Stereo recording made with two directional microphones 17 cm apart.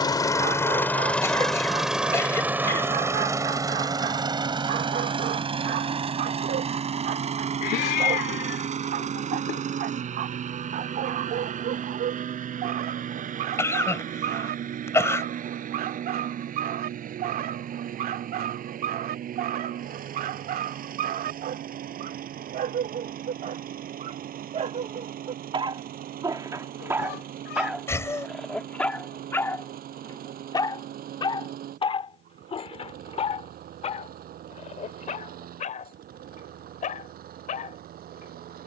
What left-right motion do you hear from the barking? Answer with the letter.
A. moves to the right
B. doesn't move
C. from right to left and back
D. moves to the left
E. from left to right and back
D.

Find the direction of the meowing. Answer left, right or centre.
left.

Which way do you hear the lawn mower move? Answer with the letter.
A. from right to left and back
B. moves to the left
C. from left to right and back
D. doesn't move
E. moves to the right
E.